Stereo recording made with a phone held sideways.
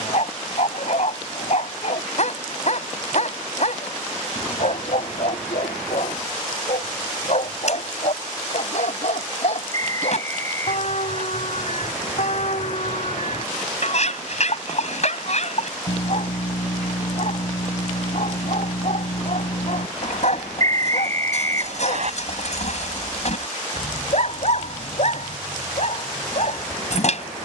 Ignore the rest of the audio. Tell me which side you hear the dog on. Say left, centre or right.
left.